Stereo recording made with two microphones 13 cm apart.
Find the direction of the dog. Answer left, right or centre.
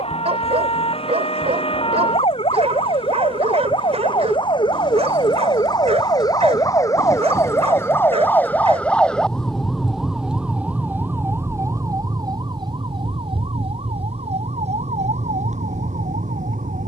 right.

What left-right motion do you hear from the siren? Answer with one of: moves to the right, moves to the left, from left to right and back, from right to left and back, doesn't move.
moves to the right.